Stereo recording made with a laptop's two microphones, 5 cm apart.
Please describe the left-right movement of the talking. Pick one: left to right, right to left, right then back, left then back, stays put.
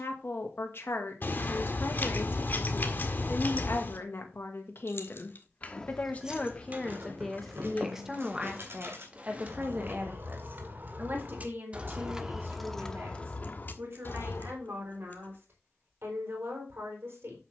left to right.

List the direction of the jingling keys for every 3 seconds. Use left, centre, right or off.
off, left, right, right, left, off.